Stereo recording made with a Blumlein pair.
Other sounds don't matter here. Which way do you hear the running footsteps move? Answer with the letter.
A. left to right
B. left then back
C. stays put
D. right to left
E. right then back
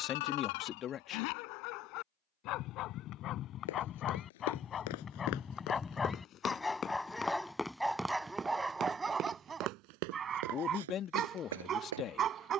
A.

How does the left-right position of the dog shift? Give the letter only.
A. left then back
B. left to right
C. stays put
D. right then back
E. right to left
B.